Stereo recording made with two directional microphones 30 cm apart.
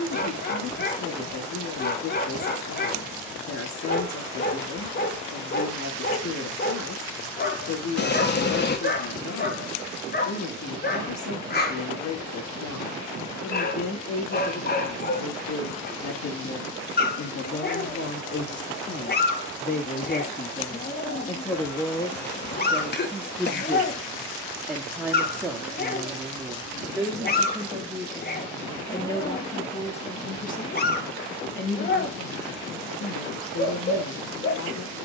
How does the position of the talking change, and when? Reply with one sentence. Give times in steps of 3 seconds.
In this clip you hear the talking on the left from 0 s, in the centre from 21 s and on the left from 30 s.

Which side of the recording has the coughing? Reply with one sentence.
In this clip you hear the coughing on the left.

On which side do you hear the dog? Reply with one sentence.
In this clip you hear the dog on the left.